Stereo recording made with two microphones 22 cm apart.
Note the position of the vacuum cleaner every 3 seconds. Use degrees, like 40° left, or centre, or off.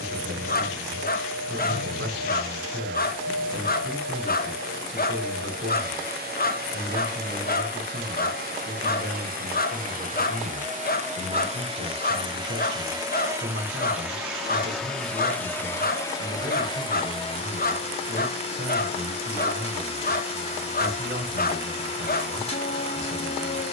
50° right, 50° right, 50° right, 40° right, 10° right, 20° left, 30° left, 30° left.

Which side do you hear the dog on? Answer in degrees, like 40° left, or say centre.
40° left.